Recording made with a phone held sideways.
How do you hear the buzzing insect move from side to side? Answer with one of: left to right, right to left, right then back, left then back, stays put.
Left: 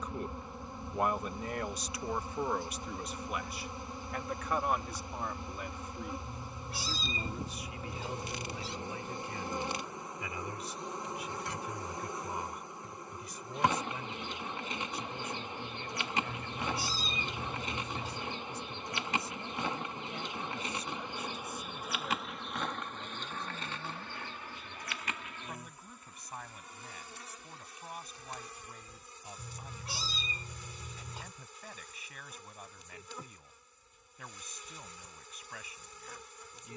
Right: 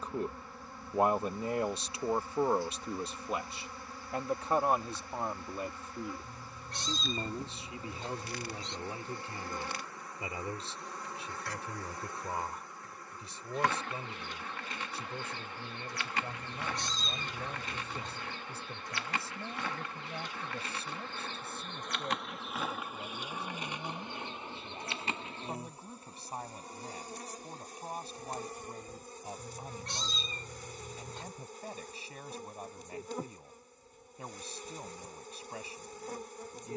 left to right.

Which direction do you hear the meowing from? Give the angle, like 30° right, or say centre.
10° left.